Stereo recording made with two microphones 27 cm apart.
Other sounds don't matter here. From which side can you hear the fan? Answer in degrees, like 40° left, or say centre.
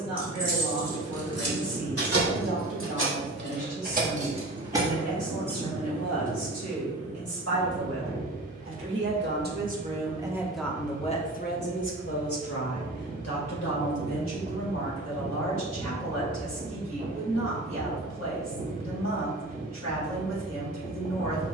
30° right.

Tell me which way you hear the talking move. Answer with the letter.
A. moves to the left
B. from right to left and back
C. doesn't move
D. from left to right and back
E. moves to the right
A.